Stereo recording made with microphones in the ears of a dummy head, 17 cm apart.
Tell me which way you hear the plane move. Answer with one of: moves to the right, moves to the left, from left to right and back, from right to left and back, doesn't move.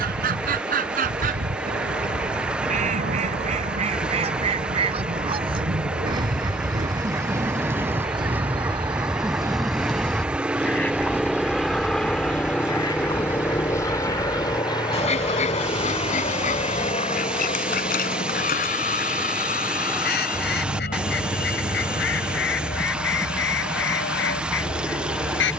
moves to the left.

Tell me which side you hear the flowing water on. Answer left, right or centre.
centre.